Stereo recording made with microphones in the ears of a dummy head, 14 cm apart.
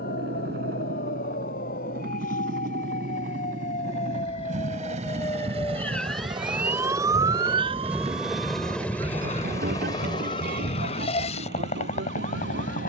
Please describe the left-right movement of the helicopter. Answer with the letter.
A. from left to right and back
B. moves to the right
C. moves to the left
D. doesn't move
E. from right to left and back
C.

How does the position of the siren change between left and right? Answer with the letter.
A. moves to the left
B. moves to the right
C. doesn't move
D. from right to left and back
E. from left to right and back
B.